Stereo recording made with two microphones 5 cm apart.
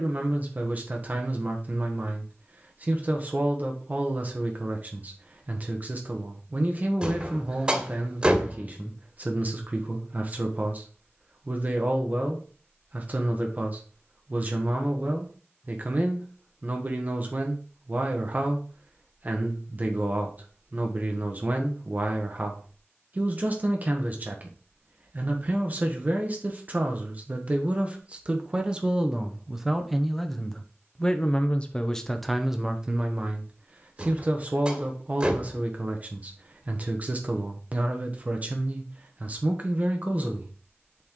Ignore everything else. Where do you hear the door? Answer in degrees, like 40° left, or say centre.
20° right.